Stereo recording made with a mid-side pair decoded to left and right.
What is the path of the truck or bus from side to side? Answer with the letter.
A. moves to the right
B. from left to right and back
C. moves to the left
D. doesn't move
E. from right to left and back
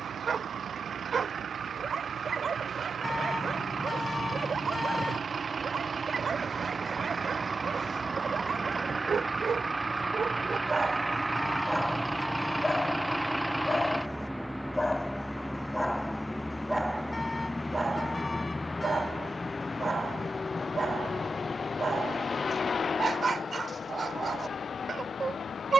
C.